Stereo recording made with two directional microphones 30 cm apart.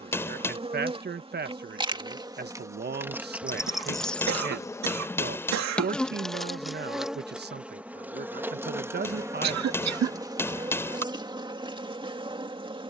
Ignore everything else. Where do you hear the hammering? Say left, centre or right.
centre.